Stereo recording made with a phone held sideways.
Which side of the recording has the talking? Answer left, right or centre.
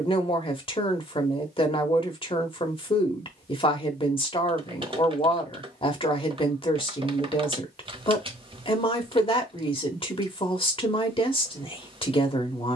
left.